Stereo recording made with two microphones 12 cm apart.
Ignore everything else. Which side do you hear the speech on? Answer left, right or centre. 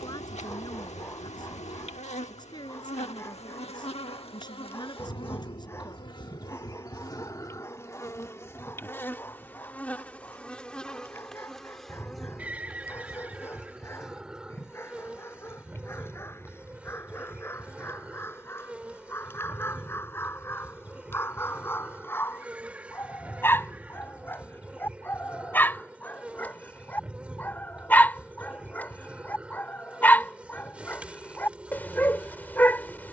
left.